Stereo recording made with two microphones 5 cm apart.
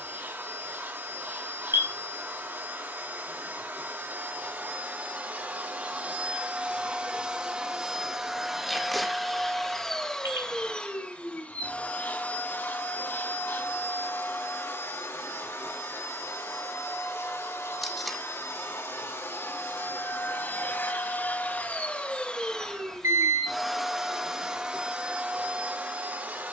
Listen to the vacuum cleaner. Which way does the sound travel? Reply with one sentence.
You can hear the vacuum cleaner go left and come back.